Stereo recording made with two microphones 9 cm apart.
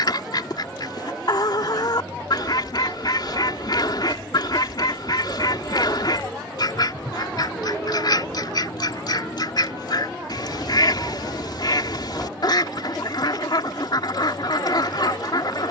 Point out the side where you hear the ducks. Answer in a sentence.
In this clip you hear the ducks on the left.